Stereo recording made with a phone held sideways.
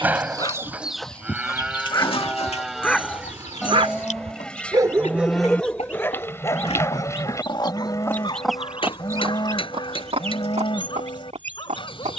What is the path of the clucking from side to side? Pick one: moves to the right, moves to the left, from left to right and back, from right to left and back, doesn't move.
from right to left and back.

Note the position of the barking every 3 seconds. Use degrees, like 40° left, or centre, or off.
30° left, 20° right, 30° left, 40° left.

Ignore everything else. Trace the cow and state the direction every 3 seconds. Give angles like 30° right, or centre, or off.
10° right, 10° left, 20° left, 40° left.